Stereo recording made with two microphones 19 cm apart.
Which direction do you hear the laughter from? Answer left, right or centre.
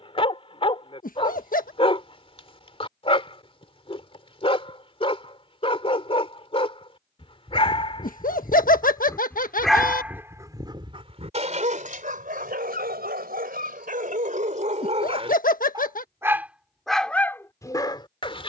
left.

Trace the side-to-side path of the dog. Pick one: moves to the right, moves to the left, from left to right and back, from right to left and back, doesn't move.
from left to right and back.